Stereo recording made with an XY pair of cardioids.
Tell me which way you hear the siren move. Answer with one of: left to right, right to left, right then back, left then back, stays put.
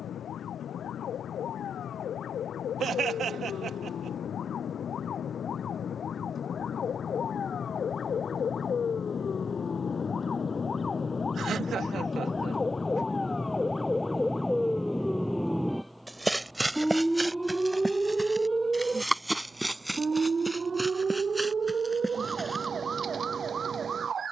left to right.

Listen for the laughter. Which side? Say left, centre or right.
right.